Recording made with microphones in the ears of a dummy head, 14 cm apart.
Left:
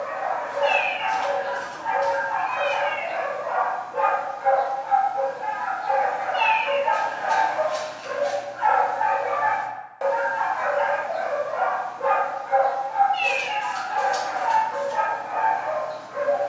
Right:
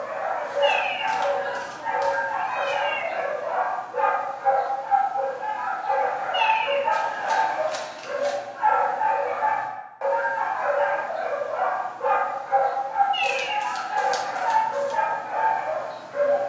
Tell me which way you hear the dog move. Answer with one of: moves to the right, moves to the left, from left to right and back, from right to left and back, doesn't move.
from right to left and back.